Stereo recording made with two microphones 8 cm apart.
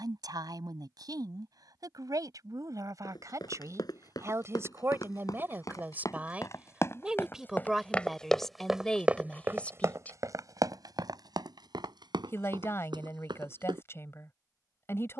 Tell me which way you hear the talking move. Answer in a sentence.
In this clip you hear the talking move to the left.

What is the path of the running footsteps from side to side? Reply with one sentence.
You can hear the running footsteps go from the left side to the right.